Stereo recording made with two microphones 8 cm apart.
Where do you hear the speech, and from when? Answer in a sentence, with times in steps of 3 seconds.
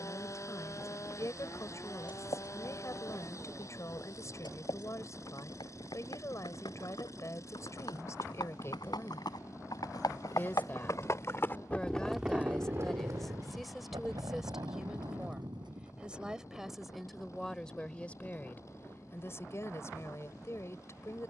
You can hear the speech on the left from 0 s, in the centre from 12 s and on the left from 18 s.